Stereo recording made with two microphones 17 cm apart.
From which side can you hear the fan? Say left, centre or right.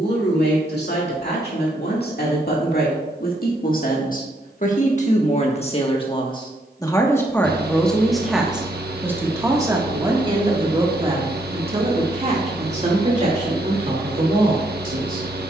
right.